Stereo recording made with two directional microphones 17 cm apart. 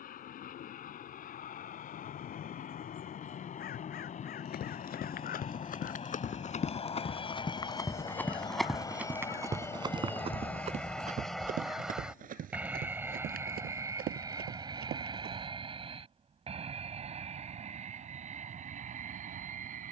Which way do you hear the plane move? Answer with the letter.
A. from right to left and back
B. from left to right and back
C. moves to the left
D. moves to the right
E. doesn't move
D.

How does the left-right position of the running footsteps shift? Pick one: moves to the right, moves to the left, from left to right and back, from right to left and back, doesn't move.
moves to the right.